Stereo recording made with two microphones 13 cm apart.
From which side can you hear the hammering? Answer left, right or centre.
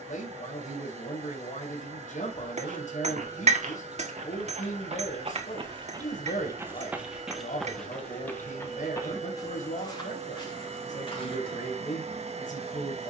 right.